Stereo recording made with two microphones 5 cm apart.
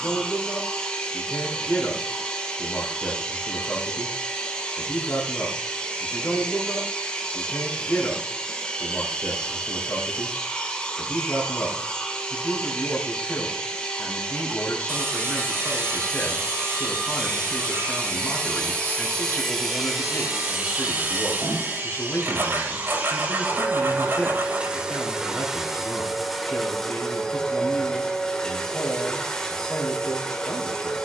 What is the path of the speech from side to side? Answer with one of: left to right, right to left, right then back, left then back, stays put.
stays put.